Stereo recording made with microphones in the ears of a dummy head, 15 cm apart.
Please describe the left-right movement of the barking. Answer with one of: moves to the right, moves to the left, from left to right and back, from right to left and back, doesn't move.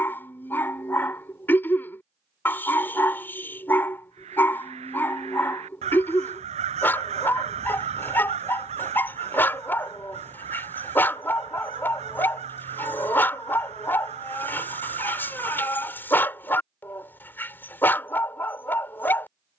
doesn't move.